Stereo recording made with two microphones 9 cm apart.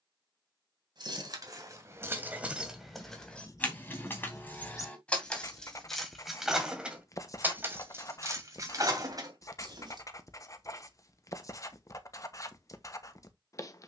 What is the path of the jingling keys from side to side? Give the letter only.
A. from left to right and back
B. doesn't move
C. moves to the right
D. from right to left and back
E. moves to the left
D.